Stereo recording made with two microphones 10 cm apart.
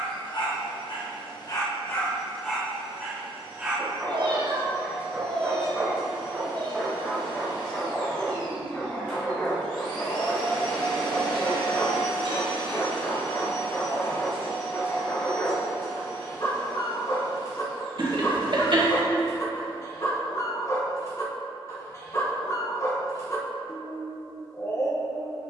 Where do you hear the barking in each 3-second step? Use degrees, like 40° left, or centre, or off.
30° left, 10° right, 10° left, 30° left, 40° left, 40° left, 40° left, 40° left, 40° left.